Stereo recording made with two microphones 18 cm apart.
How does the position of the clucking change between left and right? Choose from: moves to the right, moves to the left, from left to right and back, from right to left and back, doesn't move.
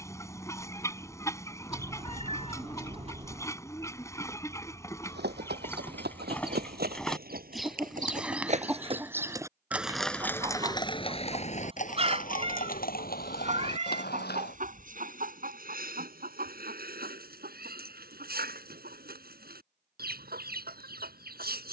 moves to the right.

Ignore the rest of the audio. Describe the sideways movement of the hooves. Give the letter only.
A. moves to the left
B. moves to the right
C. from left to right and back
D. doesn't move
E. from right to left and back
A.